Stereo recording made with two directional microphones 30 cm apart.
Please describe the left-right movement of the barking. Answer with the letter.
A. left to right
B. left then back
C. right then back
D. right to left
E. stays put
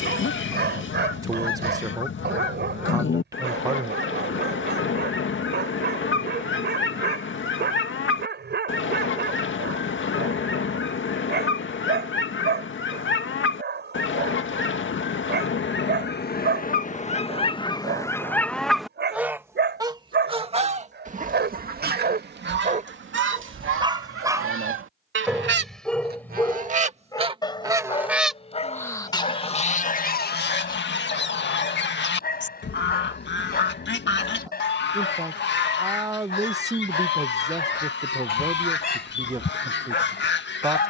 D.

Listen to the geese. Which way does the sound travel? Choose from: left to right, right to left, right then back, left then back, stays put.
right then back.